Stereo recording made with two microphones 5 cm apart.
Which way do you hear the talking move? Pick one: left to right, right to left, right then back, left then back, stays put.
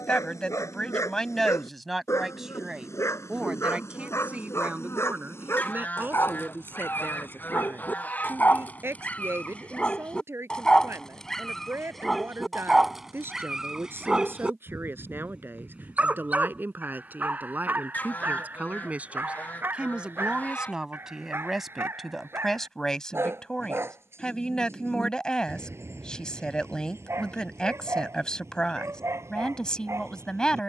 right then back.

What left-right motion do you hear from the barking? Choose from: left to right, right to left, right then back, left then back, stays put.
left to right.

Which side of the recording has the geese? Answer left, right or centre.
left.